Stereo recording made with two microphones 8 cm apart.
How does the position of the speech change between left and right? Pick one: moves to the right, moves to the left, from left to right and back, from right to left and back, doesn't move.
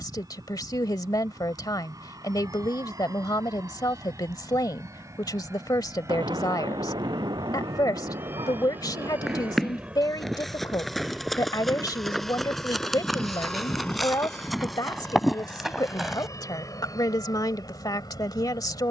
doesn't move.